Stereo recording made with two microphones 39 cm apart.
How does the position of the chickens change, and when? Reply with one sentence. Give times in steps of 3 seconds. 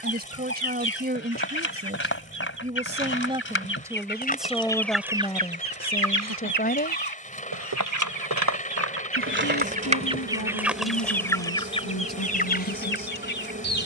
In this clip you hear the chickens on the left from 0 s, in the centre from 3 s, on the right from 6 s, in the centre from 9 s and on the left from 12 s.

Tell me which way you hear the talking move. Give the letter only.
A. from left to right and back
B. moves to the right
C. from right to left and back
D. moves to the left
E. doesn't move
D.